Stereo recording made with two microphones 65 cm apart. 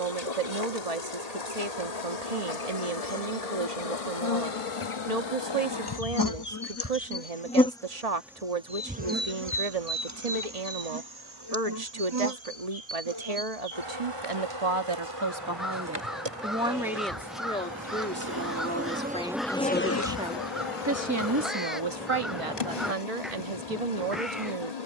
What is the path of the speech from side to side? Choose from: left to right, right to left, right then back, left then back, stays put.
left then back.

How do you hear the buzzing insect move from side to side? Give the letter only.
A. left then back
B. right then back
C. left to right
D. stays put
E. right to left
B.